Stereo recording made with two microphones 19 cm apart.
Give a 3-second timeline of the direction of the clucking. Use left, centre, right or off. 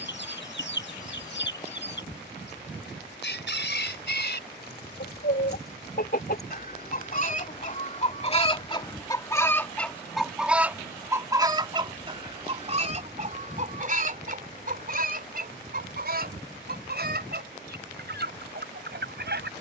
left, left, left, centre, right, right, right.